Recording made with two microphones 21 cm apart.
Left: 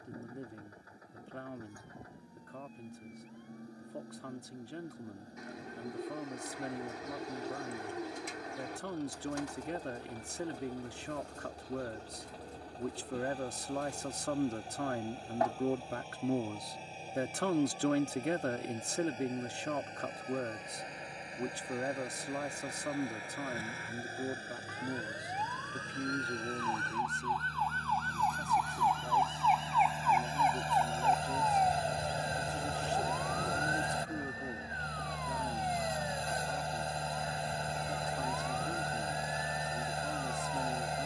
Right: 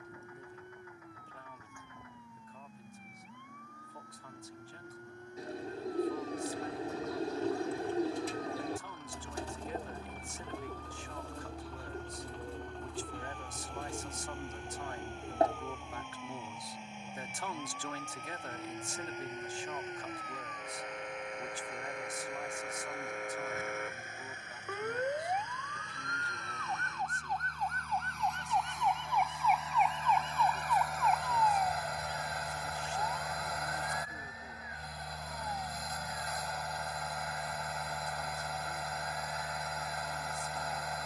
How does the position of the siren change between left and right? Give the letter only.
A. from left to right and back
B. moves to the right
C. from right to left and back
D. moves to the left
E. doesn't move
D.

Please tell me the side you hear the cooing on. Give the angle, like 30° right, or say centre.
30° right.